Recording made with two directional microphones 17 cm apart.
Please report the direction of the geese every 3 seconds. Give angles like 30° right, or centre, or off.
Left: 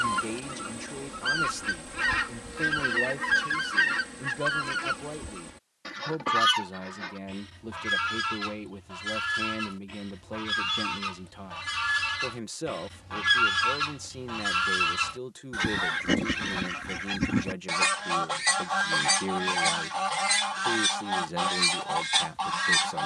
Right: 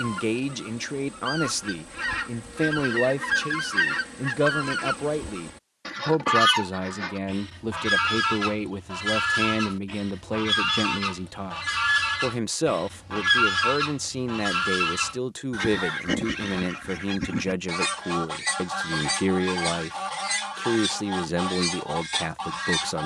20° left, 10° right, 30° right, 30° right, 10° right, 10° left, 20° left, 20° left.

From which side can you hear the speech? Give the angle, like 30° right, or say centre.
50° right.